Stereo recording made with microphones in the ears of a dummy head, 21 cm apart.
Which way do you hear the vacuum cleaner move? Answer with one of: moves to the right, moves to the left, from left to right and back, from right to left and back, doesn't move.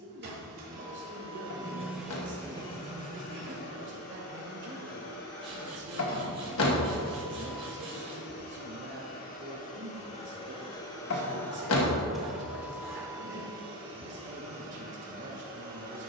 from right to left and back.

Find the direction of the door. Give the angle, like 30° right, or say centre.
60° left.